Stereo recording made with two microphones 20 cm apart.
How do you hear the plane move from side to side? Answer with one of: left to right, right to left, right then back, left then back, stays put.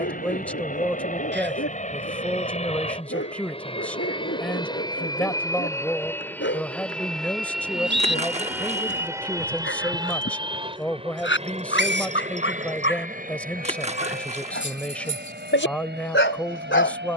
left to right.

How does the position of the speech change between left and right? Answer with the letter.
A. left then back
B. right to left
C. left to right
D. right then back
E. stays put
E.